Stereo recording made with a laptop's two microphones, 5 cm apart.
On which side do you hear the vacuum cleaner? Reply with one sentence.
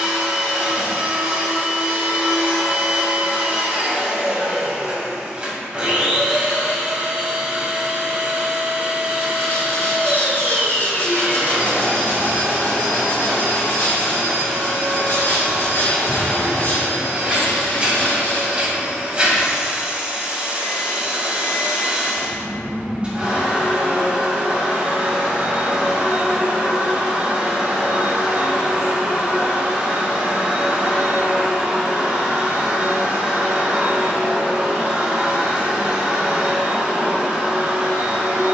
In this clip you hear the vacuum cleaner on the right.